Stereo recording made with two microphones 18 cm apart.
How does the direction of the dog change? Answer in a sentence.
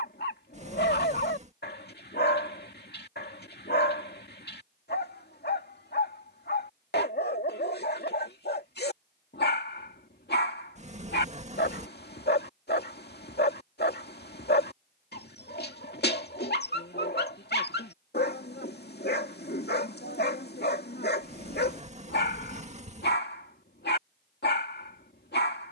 In this clip you hear the dog stay in one place.